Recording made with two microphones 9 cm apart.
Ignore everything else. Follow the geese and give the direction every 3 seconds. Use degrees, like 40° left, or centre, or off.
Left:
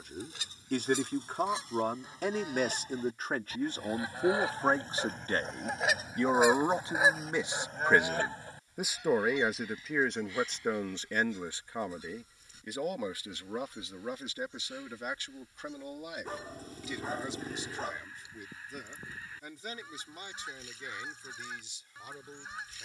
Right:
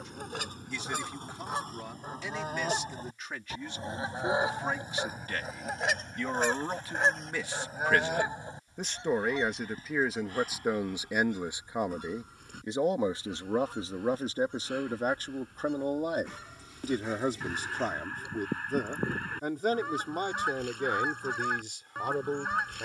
50° right, 20° right, centre, 50° right, 60° right, 60° right, 60° right, 60° right.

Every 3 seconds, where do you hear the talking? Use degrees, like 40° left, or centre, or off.
50° left, 40° left, 20° left, 10° right, 30° right, 50° right, 60° right, 60° right.